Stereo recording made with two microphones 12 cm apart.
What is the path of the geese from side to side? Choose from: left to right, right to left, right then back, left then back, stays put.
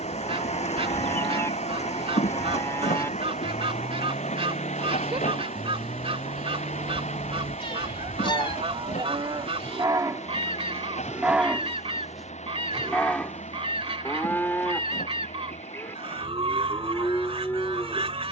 stays put.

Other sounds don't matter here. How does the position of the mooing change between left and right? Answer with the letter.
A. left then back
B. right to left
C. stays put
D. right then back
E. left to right
D.